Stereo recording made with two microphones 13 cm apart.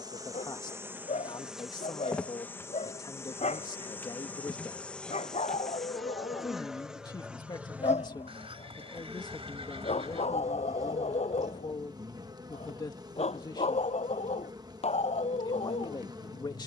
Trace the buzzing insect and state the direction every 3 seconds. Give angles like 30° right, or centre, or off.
centre, 10° left, 10° right, 30° right, 30° right, 30° right.